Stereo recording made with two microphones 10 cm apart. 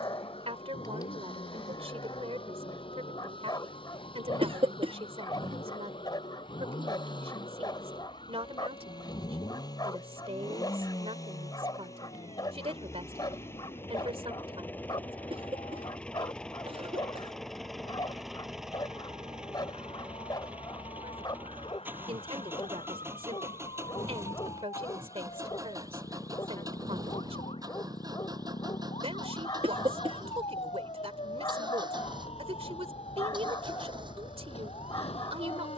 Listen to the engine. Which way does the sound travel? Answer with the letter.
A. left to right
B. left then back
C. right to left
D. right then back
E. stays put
A.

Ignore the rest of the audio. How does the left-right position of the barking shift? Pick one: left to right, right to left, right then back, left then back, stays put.
stays put.